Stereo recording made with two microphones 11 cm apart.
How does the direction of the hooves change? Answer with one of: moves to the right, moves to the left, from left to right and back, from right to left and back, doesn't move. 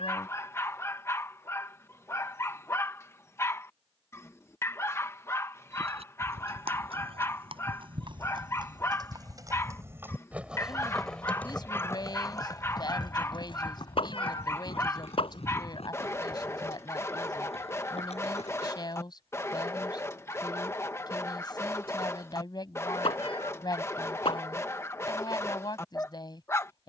moves to the left.